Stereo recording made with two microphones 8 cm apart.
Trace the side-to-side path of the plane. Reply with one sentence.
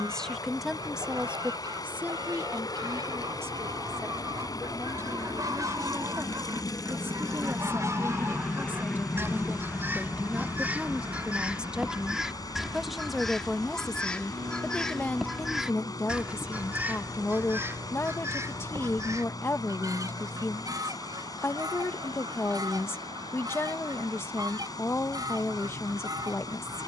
You can hear the plane go from the left side to the right.